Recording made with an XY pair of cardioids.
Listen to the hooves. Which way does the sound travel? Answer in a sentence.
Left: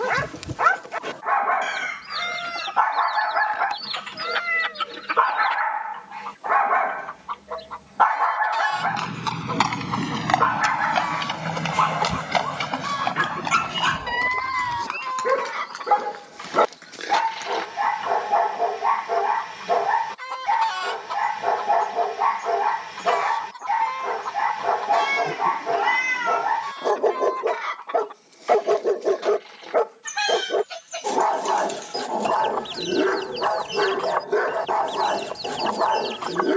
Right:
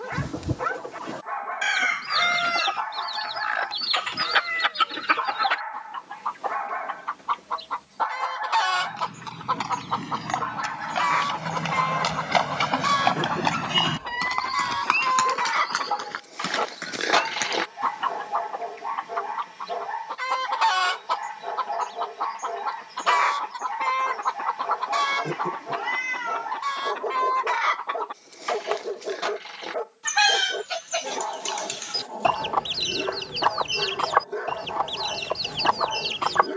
You can hear the hooves travel towards the right.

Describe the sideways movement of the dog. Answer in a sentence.
You can hear the dog stay put.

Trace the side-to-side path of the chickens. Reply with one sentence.
You can hear the chickens stay put.